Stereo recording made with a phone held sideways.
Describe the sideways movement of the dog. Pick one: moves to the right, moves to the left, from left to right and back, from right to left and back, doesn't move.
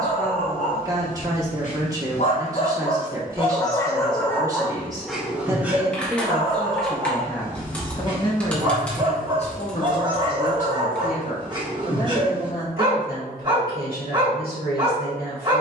moves to the right.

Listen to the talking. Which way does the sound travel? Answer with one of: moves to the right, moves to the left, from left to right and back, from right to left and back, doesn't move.
moves to the left.